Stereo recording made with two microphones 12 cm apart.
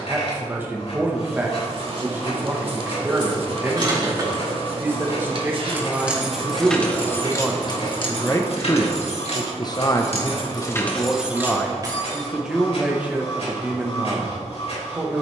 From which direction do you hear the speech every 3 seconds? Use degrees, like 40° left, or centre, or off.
20° right, 20° right, 10° left, 20° left, 10° right.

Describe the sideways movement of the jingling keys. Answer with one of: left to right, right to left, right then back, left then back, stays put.
left then back.